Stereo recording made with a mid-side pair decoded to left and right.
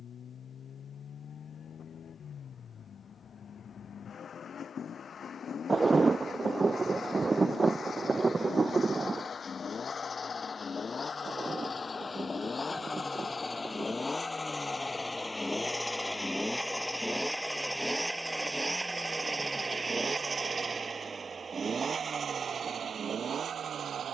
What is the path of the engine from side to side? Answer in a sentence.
In this clip you hear the engine move from left to right.